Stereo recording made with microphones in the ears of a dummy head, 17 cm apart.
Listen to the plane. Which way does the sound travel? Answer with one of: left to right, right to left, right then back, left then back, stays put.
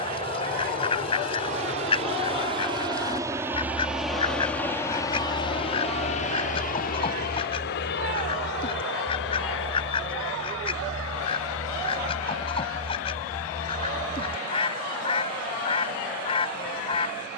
right to left.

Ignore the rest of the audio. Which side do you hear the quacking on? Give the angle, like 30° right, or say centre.
30° left.